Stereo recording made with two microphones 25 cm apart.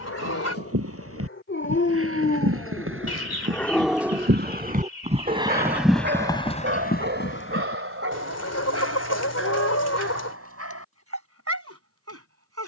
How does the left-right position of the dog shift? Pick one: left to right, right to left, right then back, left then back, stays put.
left to right.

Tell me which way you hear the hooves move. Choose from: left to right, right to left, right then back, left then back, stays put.
right to left.